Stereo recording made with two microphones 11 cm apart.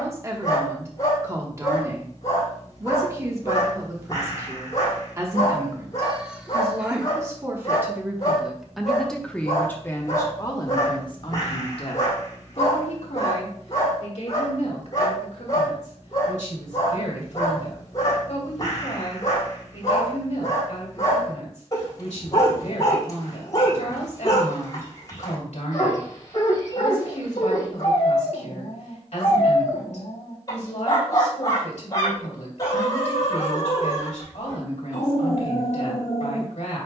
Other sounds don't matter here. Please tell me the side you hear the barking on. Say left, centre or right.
left.